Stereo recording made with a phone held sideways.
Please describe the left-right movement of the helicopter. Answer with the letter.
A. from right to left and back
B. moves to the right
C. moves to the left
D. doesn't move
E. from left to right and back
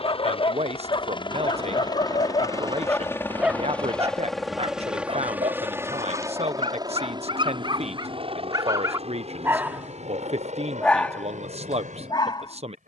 B.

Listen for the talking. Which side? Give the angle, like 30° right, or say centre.
50° right.